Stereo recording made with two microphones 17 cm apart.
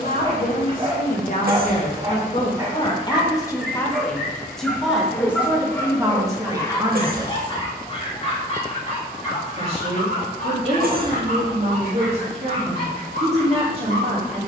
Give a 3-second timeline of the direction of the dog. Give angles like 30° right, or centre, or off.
30° right, centre, 30° left, 50° left, 60° left.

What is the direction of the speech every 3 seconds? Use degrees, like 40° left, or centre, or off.
50° left, centre, 20° right, 40° right, 40° right.